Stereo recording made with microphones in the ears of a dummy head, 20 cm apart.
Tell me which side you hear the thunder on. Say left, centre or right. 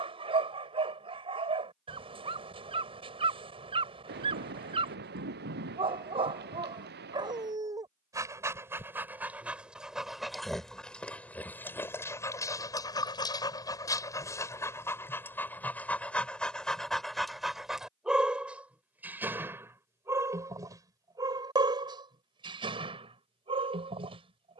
right.